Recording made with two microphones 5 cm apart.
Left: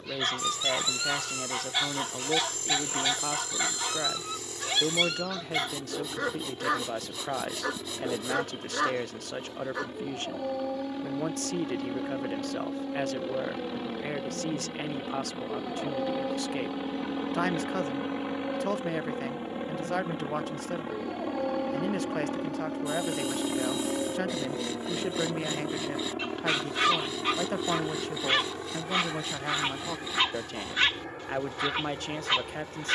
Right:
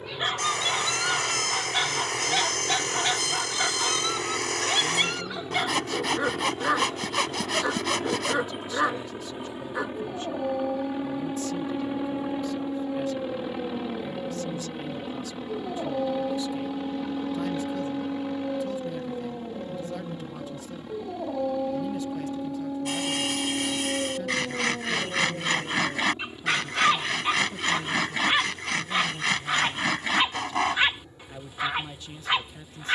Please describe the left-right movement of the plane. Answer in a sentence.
In this clip you hear the plane move to the left.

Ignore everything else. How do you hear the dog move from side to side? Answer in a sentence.
In this clip you hear the dog stay in one place.